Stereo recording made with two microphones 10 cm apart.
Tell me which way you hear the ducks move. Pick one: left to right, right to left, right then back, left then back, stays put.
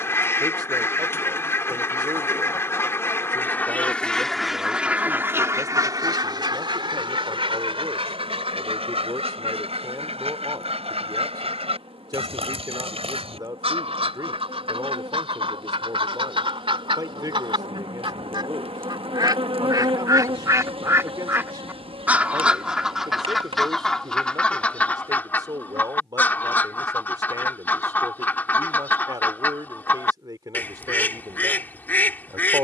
right then back.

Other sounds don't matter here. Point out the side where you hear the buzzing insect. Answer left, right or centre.
right.